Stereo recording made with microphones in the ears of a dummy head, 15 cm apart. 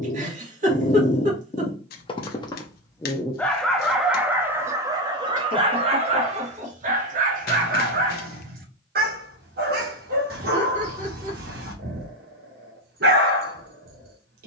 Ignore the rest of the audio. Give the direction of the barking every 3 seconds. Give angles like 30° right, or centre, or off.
40° left, 10° right, 50° right, 60° right, 60° right.